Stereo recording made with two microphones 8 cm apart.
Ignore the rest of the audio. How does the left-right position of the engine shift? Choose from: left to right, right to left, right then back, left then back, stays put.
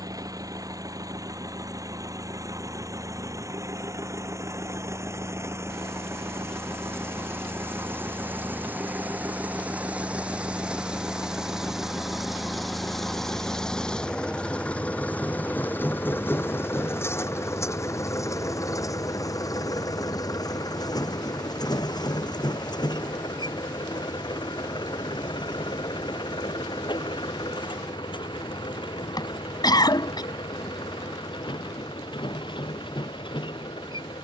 right to left.